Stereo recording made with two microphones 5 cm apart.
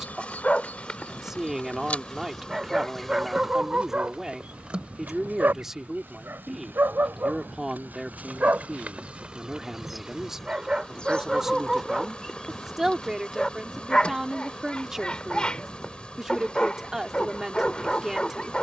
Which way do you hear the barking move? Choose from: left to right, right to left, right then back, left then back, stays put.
right then back.